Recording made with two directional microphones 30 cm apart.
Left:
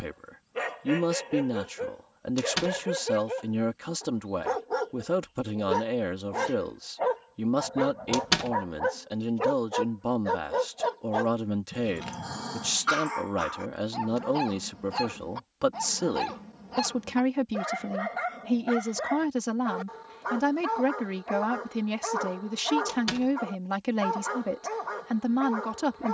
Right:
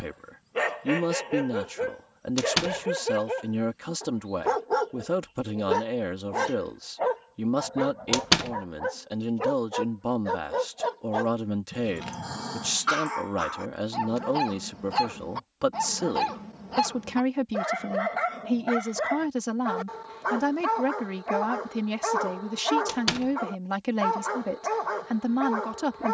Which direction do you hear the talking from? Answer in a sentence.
In this clip you hear the talking in the centre.